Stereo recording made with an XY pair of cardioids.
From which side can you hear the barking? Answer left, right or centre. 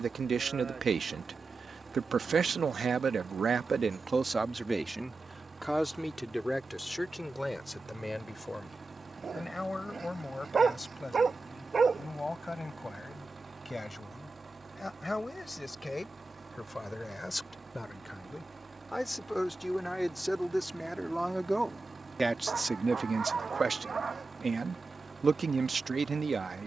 right.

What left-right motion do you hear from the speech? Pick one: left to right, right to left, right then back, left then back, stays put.
left then back.